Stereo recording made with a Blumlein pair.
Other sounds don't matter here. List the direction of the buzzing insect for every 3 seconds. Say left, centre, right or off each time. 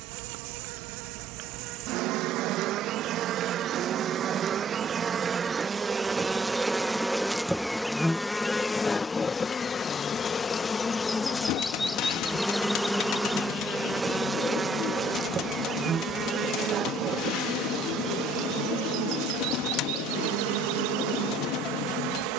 right, right, centre, centre, centre, right, right, right.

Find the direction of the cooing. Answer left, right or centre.
left.